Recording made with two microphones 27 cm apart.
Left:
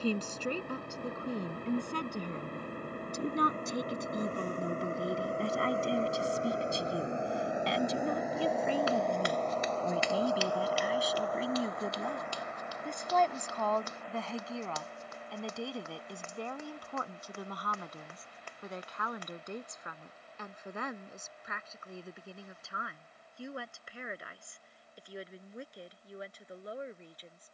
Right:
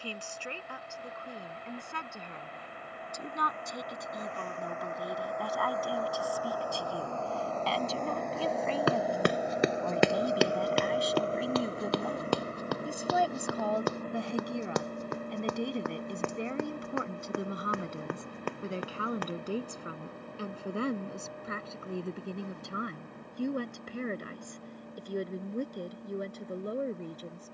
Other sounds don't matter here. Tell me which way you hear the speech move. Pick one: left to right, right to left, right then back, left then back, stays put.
left to right.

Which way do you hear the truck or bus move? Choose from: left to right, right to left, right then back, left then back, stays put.
left to right.